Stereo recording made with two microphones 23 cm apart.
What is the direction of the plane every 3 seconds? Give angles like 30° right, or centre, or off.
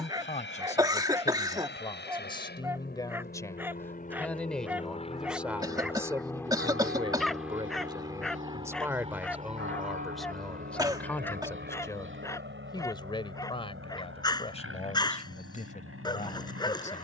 60° left, 30° left, centre, 40° right, 50° right, 60° right.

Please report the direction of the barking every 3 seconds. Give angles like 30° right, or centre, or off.
10° right, 10° right, centre, 10° left, 20° left, 20° left.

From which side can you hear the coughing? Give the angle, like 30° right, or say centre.
20° right.